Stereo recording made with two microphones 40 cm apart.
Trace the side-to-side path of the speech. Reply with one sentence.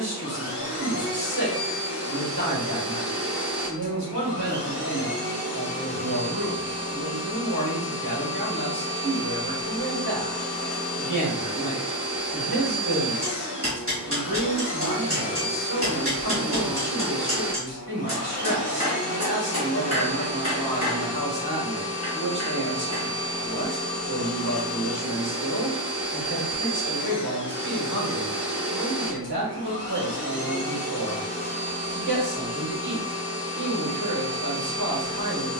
You can hear the speech stay put.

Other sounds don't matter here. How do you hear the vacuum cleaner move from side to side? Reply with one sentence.
You can hear the vacuum cleaner stay put.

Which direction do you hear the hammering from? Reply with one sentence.
In this clip you hear the hammering on the right.